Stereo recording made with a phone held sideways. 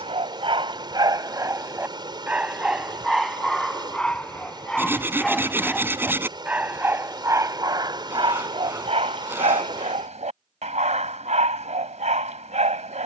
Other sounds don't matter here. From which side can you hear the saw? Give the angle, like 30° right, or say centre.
20° right.